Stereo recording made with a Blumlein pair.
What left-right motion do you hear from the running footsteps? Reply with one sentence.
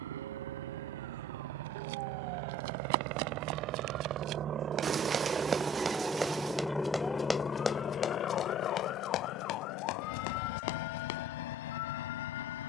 In this clip you hear the running footsteps move from right to left.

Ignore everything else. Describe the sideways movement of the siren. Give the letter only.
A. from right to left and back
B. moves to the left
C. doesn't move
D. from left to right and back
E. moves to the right
B.